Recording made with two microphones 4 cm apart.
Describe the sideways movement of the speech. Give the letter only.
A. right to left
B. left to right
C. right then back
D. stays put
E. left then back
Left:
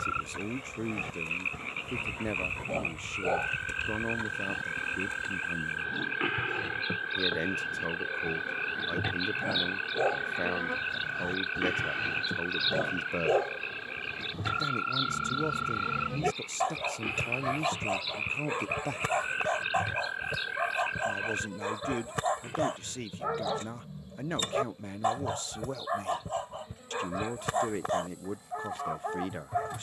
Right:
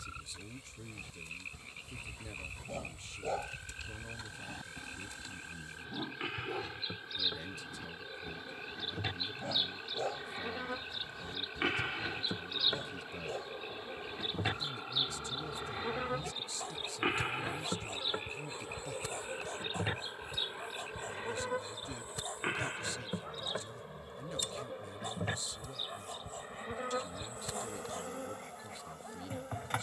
D.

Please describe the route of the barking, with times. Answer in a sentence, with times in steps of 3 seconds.
You can hear the barking on the left from 0 s, in the centre from 3 s and on the left from 9 s.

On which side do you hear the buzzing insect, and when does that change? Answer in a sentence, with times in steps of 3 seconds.
You can hear the buzzing insect on the left from 0 s, in the centre from 9 s and on the right from 15 s.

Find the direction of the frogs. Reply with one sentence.
You can hear the frogs on the left.